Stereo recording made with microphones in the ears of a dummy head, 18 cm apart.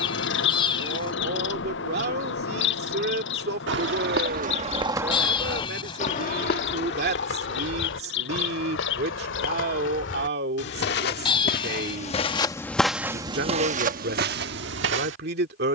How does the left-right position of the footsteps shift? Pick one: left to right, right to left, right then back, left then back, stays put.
left then back.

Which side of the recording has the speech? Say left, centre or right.
right.